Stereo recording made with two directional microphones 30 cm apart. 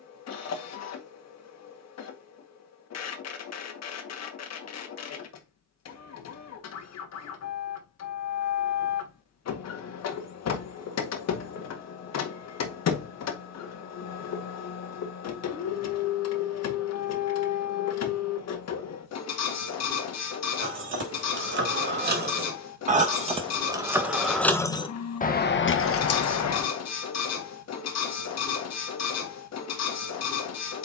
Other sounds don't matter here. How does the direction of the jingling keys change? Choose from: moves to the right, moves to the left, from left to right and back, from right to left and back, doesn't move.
moves to the left.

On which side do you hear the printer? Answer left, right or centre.
left.